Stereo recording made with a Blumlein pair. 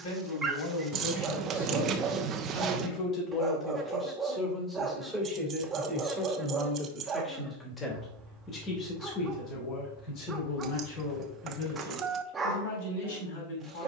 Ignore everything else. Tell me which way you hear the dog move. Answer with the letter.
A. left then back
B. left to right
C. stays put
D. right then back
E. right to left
C.